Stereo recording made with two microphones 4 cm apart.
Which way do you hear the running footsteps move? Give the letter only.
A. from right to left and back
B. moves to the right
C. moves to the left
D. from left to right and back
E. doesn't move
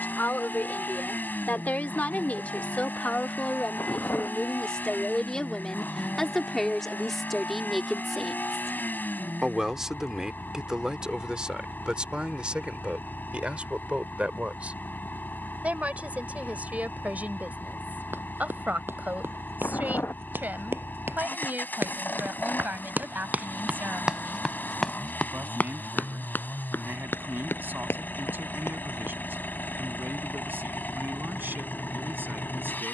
C.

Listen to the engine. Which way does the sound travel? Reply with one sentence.
In this clip you hear the engine stay put.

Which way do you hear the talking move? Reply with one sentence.
You can hear the talking travel towards the right.